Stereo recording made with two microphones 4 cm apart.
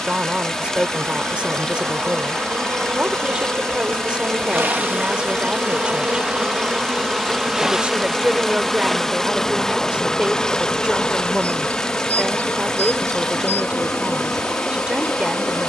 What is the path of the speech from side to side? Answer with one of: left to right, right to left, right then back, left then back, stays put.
stays put.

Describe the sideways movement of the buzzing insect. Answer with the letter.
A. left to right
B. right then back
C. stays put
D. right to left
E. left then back
D.